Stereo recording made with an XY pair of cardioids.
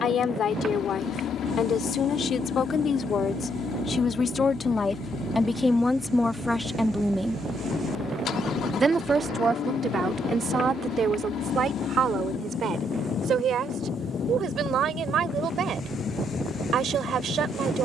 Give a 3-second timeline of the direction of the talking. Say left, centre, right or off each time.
left, left, centre, right, right, right.